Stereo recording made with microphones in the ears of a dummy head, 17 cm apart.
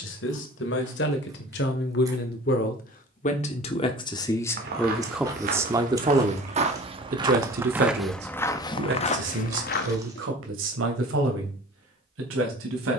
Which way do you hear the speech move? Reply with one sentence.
You can hear the speech travel towards the right.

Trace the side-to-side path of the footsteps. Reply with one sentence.
You can hear the footsteps move from right to left.